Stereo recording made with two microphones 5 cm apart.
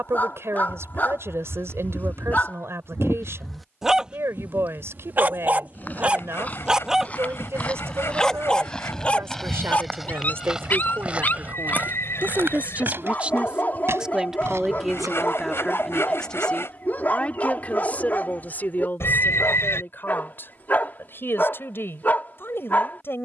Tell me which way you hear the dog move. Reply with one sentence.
You can hear the dog move from left to right and back again.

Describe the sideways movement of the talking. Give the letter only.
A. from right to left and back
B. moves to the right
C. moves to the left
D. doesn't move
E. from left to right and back
C.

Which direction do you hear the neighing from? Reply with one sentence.
In this clip you hear the neighing on the left.